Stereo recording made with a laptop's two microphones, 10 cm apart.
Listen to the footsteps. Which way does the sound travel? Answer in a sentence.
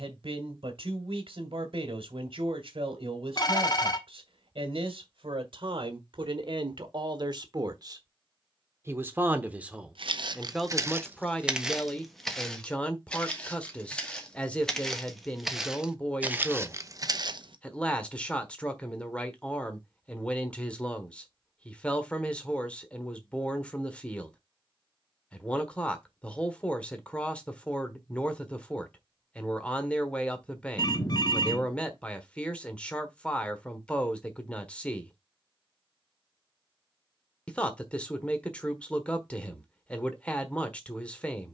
In this clip you hear the footsteps go left and come back.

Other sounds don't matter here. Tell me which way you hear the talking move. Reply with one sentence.
You can hear the talking move to the left.